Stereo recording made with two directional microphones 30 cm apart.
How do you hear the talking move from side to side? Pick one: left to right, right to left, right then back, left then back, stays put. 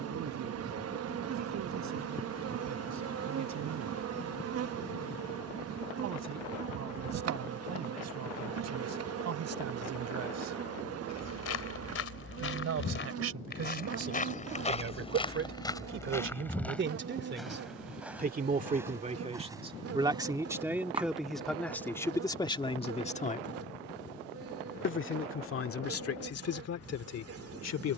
right to left.